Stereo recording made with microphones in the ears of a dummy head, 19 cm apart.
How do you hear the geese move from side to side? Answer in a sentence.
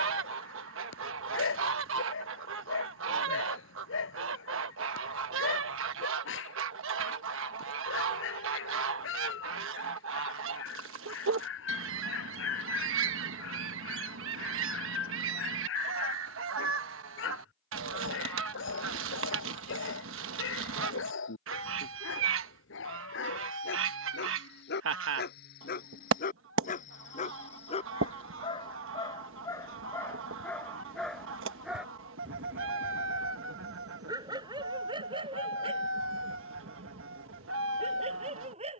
You can hear the geese stay in one place.